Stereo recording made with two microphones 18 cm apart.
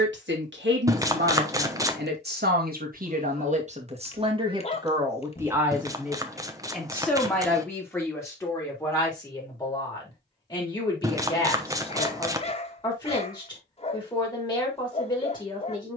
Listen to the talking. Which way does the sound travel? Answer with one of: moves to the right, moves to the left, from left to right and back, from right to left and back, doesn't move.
moves to the left.